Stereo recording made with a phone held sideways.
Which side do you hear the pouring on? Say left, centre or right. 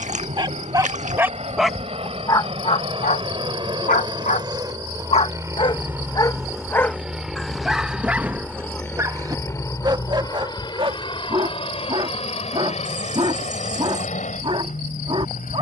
right.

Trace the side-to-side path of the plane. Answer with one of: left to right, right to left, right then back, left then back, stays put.
right to left.